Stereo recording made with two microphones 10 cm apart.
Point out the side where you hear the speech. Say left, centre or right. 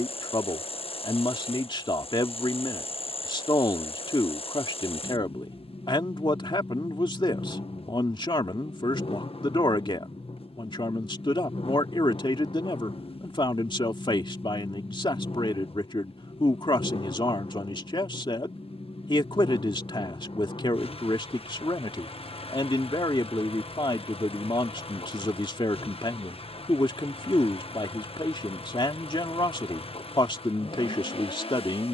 left.